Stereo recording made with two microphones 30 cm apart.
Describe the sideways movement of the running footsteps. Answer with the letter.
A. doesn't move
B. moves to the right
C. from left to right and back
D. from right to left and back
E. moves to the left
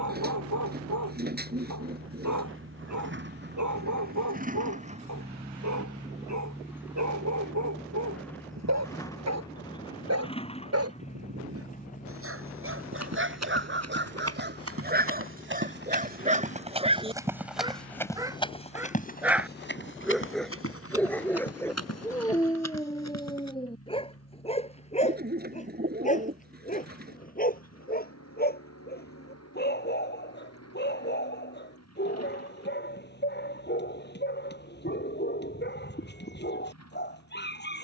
E.